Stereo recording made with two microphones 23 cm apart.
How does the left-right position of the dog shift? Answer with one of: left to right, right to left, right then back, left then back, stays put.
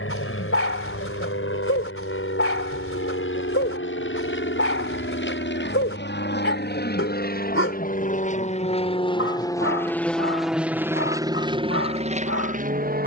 stays put.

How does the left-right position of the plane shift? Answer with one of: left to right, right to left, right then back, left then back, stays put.
left to right.